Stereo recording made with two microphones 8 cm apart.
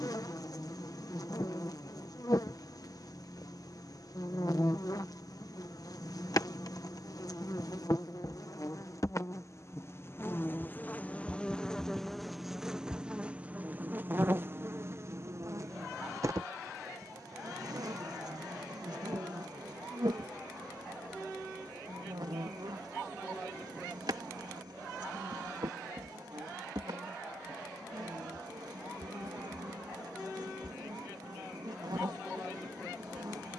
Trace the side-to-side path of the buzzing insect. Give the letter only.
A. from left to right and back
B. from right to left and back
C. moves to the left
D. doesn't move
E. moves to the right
E.